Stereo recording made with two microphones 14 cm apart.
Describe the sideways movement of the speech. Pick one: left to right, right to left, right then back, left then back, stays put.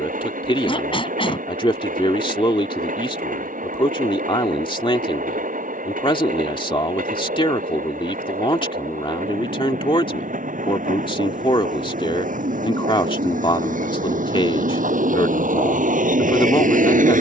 stays put.